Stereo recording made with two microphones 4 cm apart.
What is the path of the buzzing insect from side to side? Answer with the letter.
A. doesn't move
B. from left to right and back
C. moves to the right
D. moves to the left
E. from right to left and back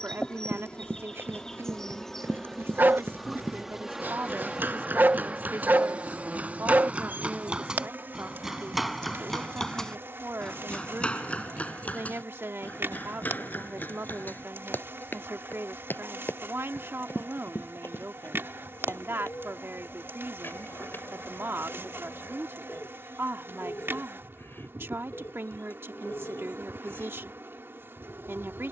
C.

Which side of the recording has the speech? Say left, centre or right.
right.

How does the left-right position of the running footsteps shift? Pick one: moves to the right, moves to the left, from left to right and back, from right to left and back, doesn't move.
moves to the left.